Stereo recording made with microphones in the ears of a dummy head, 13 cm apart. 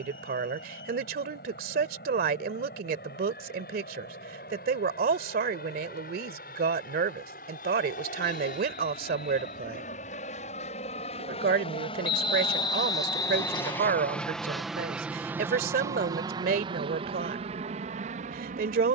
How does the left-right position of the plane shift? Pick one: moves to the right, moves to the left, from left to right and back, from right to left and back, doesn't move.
moves to the right.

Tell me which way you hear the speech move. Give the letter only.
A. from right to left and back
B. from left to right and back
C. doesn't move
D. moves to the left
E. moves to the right
C.